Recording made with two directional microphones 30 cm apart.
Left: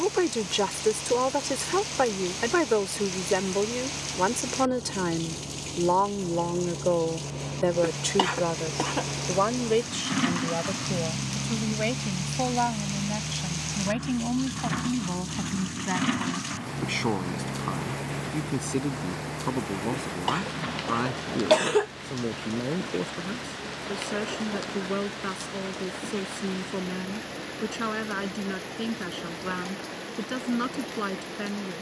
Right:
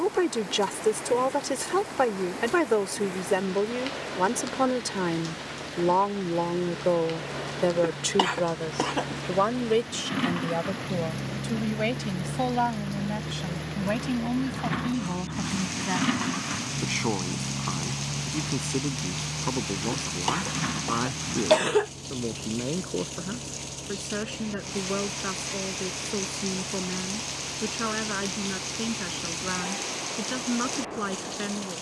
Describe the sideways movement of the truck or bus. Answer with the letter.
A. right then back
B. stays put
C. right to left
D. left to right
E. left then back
D.